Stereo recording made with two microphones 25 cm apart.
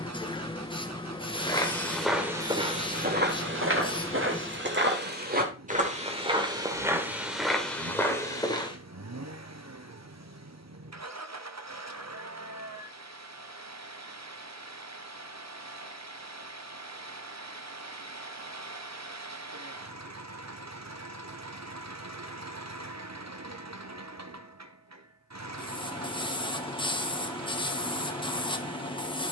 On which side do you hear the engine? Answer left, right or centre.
right.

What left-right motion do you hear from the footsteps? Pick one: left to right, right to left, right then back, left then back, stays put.
right then back.